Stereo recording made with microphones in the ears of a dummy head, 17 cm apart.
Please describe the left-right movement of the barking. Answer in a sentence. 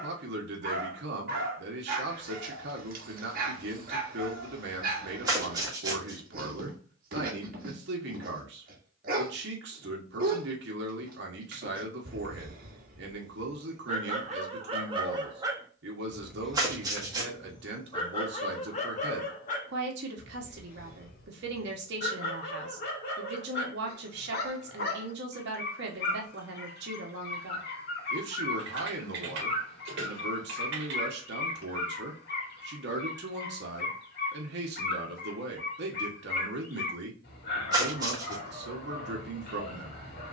You can hear the barking move from right to left.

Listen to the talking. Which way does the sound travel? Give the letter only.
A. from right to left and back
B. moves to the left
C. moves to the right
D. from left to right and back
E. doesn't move
E.